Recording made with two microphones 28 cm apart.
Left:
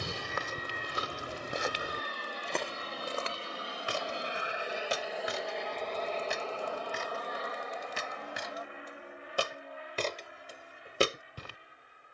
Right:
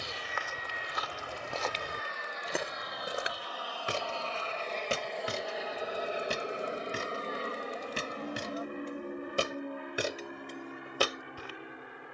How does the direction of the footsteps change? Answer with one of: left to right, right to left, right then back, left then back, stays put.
right then back.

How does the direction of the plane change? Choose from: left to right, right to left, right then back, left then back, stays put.
left to right.